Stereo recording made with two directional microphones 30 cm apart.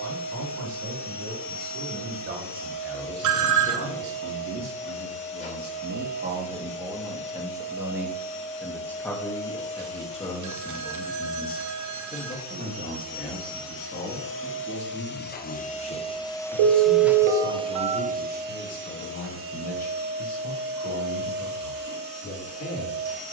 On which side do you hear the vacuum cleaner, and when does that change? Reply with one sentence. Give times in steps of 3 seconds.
You can hear the vacuum cleaner on the left from 0 s, in the centre from 15 s and on the right from 18 s.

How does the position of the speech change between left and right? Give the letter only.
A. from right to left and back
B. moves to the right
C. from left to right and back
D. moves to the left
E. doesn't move
D.